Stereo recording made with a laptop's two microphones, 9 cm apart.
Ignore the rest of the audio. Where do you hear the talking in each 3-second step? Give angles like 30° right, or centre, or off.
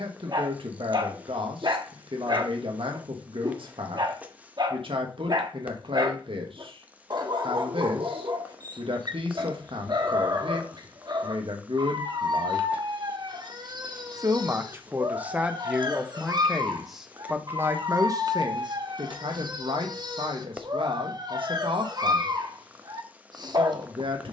70° right, 70° right, 70° right, 70° right, 40° right, 10° right, 60° right, 70° right.